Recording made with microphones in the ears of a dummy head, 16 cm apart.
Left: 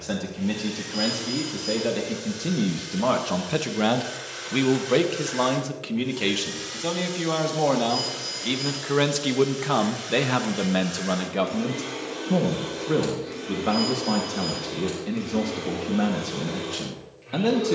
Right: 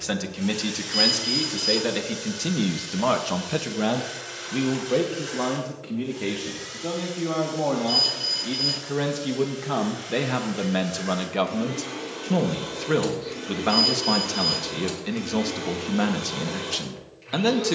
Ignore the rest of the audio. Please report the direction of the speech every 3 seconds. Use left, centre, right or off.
right, left, left, centre, right, right.